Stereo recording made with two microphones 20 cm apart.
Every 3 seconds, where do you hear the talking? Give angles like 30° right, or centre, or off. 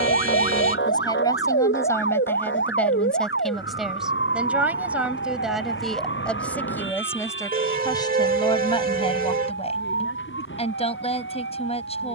20° left, centre, 10° left, 30° left.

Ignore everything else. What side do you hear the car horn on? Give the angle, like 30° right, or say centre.
40° right.